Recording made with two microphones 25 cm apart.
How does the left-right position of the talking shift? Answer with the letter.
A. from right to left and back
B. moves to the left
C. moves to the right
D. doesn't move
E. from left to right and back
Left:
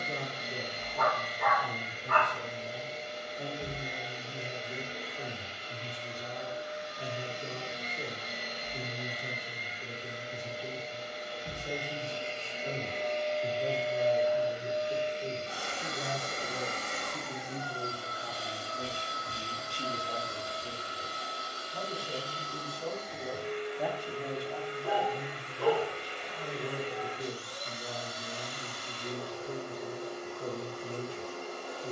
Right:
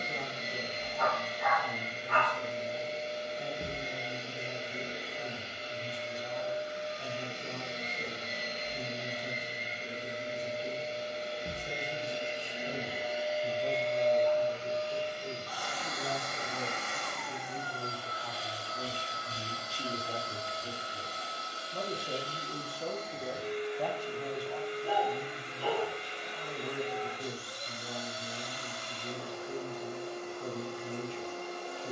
E.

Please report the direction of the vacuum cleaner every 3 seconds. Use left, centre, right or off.
right, right, right, right, centre, left, left, left, left, left, left.